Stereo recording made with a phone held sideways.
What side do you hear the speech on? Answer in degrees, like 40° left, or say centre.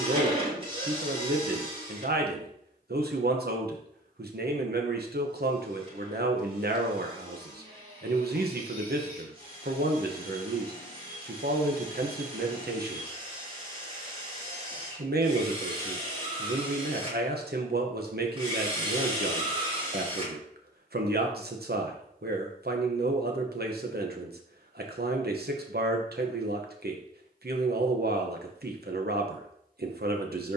80° right.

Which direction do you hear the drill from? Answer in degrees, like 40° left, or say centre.
40° right.